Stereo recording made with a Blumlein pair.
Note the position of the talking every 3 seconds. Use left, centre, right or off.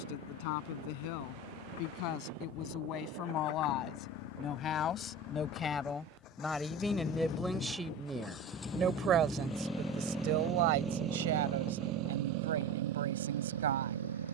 left, left, centre, right, right.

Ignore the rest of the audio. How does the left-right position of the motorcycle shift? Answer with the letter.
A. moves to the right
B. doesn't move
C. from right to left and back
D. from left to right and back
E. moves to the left
A.